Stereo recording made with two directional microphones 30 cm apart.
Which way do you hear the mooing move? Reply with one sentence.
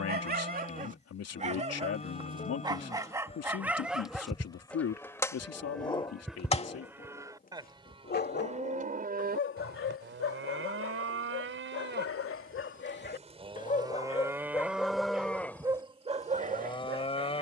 You can hear the mooing move from left to right and back again.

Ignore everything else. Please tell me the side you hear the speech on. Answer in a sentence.
You can hear the speech on the left.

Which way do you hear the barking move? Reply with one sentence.
You can hear the barking go left and come back.